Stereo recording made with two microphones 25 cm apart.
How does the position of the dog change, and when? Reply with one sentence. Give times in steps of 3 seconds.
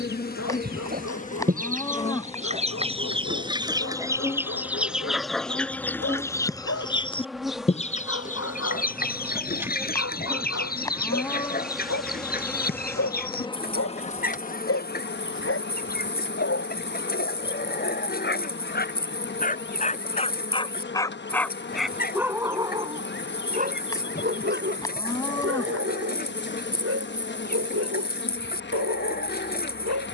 You can hear the dog on the left from 0 s, in the centre from 21 s and on the right from 24 s.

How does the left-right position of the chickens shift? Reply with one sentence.
In this clip you hear the chickens travel towards the left.